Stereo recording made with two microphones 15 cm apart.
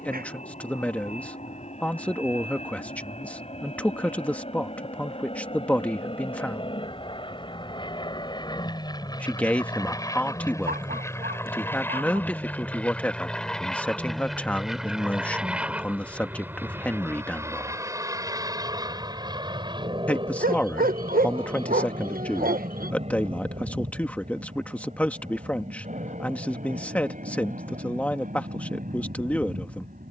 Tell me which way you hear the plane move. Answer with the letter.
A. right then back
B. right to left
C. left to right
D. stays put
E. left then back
C.